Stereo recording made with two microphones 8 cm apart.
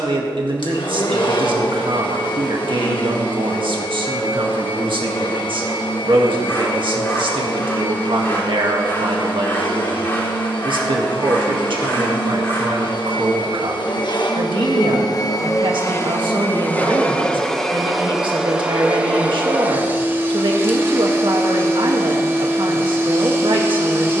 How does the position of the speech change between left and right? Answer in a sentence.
In this clip you hear the speech stay put.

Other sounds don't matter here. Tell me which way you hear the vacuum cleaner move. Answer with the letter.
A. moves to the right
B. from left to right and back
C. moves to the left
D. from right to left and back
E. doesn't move
A.